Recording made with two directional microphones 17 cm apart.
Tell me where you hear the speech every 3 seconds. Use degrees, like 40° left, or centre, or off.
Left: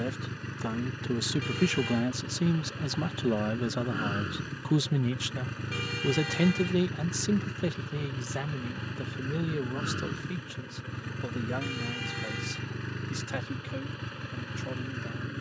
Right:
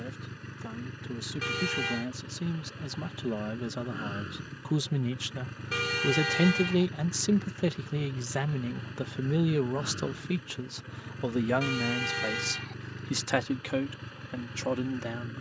40° left, 20° left, 10° right, 30° right, 50° right.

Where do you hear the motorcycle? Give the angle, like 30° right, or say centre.
30° left.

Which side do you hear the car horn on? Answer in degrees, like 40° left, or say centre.
40° right.